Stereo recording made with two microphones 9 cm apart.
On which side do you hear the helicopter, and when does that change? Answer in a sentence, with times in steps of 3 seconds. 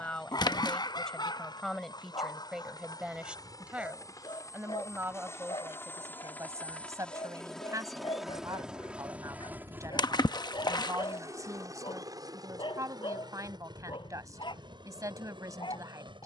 You can hear the helicopter on the left from 0 s, in the centre from 6 s and on the right from 9 s.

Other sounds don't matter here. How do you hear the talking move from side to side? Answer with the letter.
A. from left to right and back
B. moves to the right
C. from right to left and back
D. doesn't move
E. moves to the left
B.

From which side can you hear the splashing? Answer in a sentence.
In this clip you hear the splashing on the left.